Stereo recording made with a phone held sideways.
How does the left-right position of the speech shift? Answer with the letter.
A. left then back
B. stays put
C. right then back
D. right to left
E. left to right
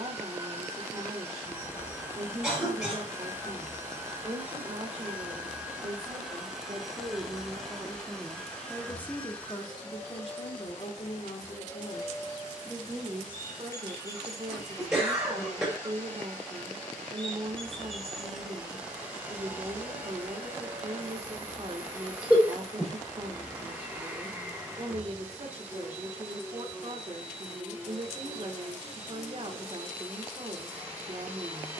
A.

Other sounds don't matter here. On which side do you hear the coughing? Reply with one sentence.
In this clip you hear the coughing in the centre.